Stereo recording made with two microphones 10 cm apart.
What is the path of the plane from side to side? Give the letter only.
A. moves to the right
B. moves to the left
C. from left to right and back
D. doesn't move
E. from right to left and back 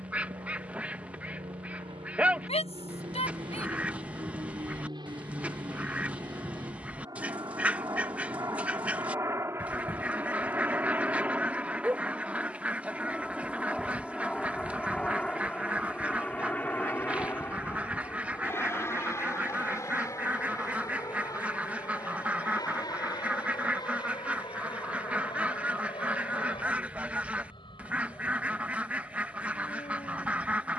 B.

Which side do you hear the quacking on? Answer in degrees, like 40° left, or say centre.
10° right.